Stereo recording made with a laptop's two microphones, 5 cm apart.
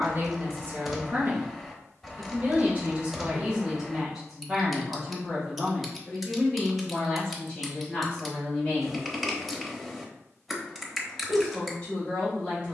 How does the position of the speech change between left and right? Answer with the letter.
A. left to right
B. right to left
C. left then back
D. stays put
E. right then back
B.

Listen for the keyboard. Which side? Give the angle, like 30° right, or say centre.
centre.